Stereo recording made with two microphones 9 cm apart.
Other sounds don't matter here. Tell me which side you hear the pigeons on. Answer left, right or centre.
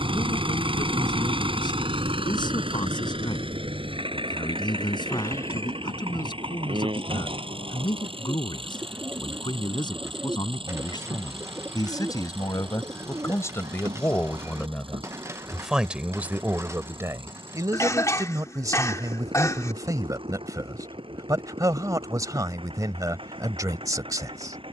right.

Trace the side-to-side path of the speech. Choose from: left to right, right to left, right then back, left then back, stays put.
left to right.